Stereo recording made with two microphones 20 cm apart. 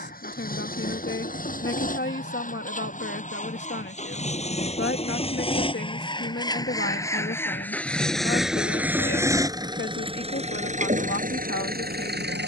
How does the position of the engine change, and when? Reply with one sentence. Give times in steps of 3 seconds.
In this clip you hear the engine on the left from 0 s, in the centre from 6 s and on the right from 9 s.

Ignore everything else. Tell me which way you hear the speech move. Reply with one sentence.
You can hear the speech stay put.